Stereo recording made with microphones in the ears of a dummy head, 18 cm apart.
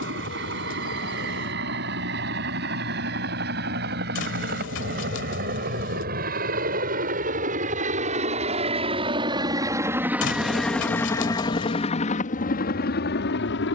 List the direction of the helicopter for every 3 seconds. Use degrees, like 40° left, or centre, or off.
60° right, 50° right, 40° right, centre, 50° left.